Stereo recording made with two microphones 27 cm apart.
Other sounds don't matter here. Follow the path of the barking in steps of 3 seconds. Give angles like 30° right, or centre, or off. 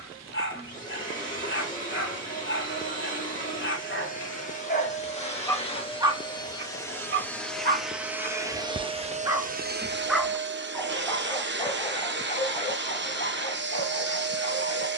40° left, 40° left, 30° right, centre, 30° left.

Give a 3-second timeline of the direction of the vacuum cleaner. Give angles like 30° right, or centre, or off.
30° left, 20° left, centre, 40° right, 40° right.